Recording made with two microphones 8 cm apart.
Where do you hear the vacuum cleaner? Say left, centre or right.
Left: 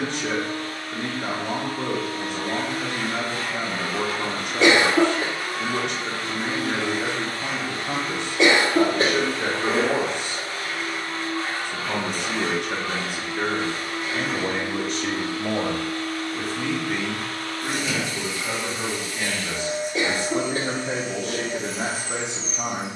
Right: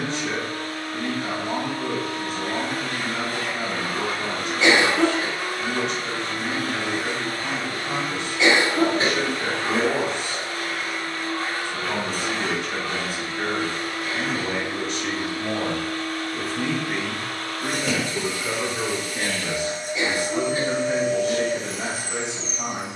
right.